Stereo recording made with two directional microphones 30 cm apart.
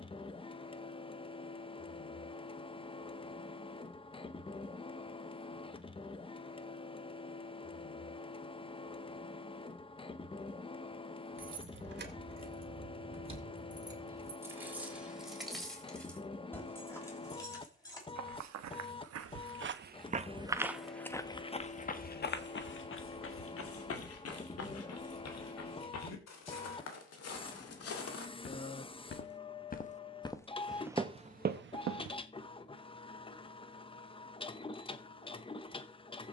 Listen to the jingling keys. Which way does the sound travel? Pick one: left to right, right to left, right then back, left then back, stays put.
right to left.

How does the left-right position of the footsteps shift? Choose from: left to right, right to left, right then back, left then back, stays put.
left then back.